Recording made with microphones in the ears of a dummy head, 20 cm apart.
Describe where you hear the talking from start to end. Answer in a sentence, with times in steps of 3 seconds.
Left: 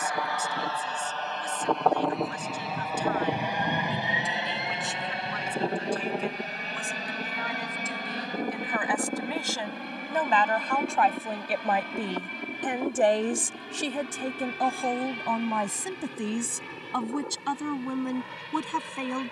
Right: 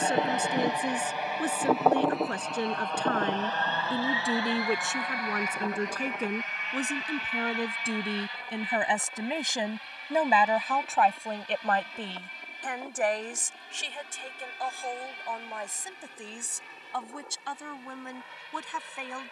In this clip you hear the talking on the right from 0 s, in the centre from 9 s and on the left from 12 s.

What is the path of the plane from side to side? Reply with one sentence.
In this clip you hear the plane travel towards the left.